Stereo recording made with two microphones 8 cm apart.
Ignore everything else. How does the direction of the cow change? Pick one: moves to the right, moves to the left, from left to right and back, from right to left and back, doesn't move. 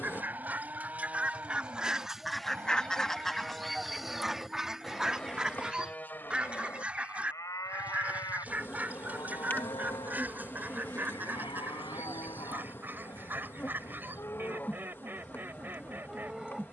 from right to left and back.